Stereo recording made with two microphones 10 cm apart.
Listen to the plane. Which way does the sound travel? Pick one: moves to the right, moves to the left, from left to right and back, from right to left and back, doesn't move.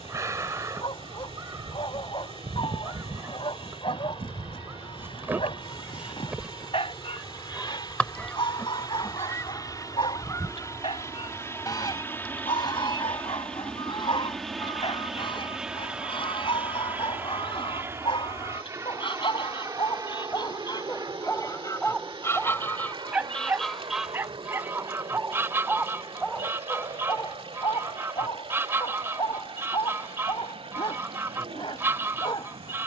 moves to the right.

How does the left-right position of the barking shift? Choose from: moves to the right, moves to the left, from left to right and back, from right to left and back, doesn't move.
from left to right and back.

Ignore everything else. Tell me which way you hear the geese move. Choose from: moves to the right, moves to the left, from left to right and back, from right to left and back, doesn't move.
from right to left and back.